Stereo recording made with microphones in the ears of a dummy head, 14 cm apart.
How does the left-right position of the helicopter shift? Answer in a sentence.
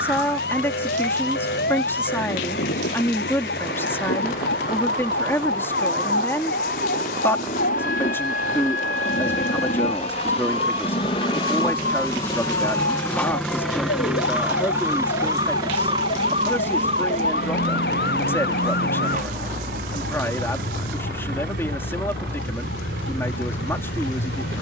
In this clip you hear the helicopter go from the left side to the right.